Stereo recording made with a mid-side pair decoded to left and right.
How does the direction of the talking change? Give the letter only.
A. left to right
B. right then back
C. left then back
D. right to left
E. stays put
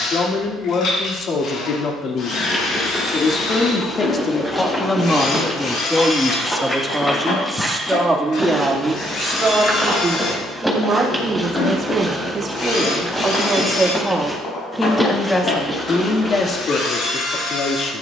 B.